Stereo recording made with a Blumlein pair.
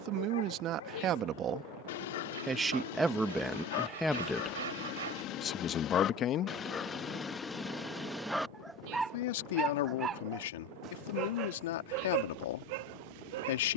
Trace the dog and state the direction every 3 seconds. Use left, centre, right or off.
left, left, centre, right, right.